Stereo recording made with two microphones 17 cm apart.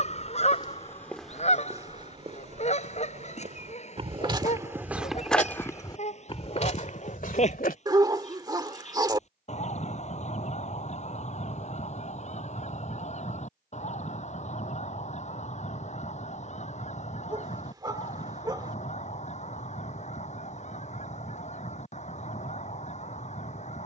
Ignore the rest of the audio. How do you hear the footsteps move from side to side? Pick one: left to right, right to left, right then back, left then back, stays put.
right then back.